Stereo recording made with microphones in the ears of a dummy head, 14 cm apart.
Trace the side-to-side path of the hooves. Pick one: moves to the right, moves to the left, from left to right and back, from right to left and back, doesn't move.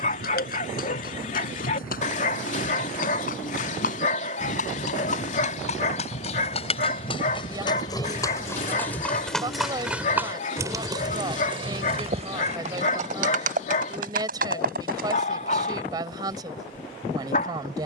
moves to the right.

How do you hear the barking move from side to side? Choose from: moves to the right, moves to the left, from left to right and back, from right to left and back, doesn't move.
doesn't move.